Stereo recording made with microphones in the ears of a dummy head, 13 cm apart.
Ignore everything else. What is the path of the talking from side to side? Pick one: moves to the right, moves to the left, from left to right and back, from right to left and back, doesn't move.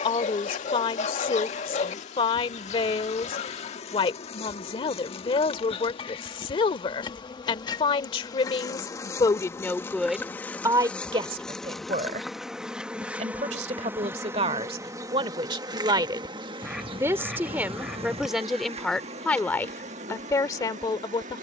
from left to right and back.